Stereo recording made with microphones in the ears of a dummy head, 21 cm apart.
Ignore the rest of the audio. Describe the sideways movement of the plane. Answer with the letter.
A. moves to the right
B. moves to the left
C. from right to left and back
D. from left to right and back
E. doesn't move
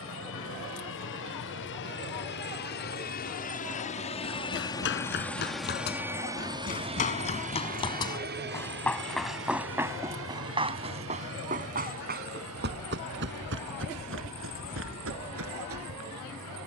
A.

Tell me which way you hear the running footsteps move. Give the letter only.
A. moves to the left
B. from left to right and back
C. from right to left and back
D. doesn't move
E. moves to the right
E.